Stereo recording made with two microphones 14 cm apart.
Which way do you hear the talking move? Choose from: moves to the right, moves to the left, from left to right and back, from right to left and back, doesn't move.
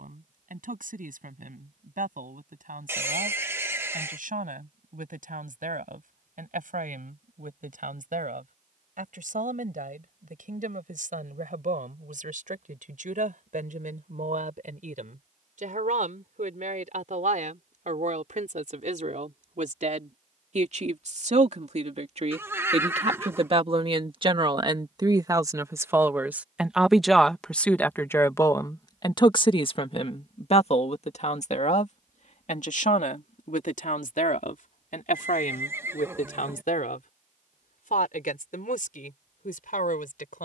moves to the left.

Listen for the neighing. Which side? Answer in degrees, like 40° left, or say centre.
20° right.